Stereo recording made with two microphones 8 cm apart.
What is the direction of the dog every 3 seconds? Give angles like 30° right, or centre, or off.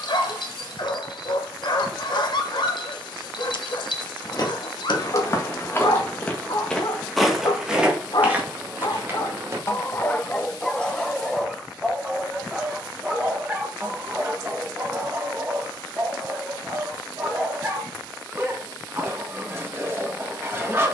60° left, 60° left, 60° left, 20° left, 20° right, 30° right, 30° right.